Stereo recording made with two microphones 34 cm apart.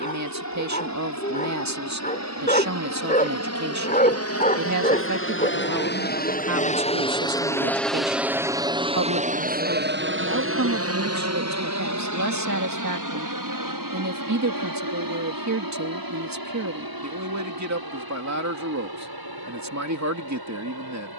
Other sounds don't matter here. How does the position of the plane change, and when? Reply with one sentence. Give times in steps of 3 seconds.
In this clip you hear the plane on the left from 0 s, in the centre from 6 s and on the right from 9 s.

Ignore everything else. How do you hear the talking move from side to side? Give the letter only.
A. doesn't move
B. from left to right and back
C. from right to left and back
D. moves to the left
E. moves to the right
A.